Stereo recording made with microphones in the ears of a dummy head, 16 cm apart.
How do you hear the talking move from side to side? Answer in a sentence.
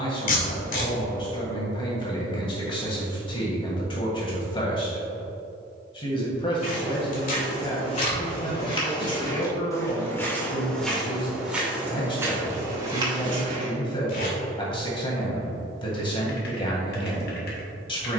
You can hear the talking stay put.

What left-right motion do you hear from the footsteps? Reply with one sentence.
You can hear the footsteps go from the left side to the right.